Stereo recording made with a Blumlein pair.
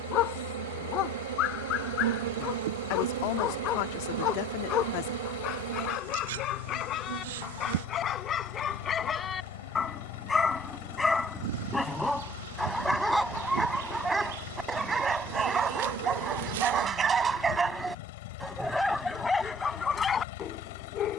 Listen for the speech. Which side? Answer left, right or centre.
left.